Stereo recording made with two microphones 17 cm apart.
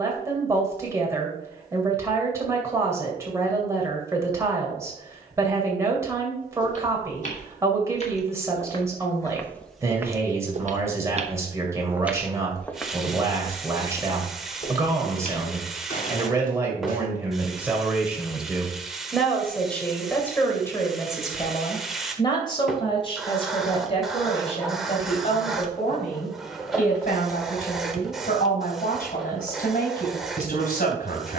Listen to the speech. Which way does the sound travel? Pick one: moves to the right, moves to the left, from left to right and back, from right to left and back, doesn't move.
moves to the left.